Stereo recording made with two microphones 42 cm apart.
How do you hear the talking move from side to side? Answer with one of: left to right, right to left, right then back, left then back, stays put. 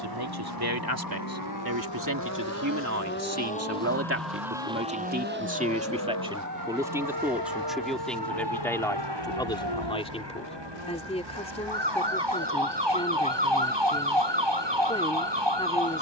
right to left.